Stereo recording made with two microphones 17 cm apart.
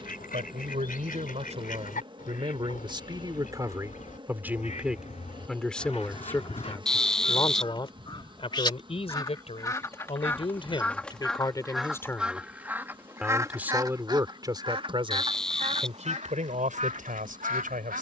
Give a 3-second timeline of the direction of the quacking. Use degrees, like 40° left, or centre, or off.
50° left, 50° left, 30° left, 10° left, 20° right, 40° right.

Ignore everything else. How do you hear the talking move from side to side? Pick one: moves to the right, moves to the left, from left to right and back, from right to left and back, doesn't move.
from right to left and back.